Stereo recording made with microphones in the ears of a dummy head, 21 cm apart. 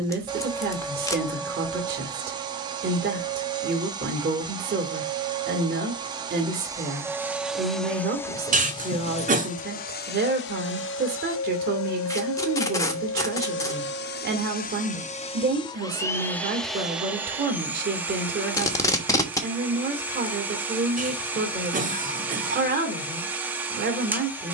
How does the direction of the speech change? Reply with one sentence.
You can hear the speech stay in one place.